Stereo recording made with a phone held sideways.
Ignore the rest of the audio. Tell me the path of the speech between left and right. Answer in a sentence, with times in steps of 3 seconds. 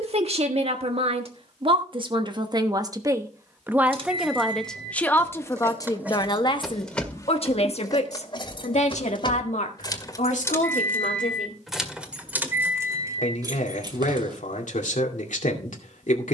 In this clip you hear the speech on the right from 0 s, in the centre from 3 s and on the left from 6 s.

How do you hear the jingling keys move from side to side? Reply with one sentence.
In this clip you hear the jingling keys move from right to left and back again.